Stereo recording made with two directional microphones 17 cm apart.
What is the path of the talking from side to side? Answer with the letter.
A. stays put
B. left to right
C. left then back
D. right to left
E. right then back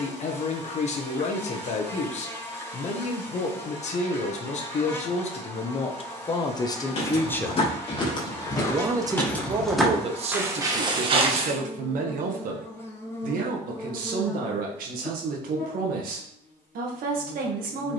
B.